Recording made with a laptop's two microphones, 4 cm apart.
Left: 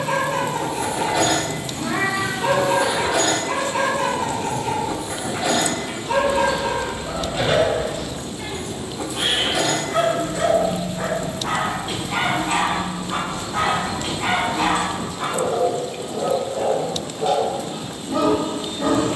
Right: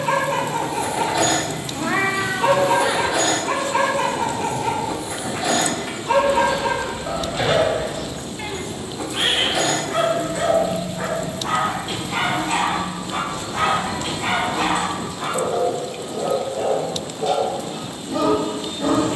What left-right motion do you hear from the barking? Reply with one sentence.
In this clip you hear the barking move to the left.